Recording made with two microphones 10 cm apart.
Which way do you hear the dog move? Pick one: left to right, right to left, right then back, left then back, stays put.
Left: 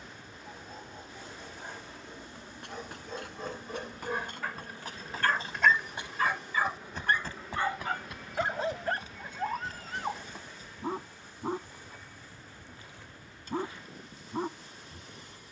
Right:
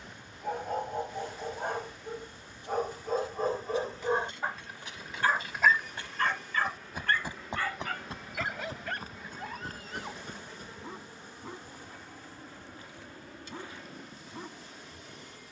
right to left.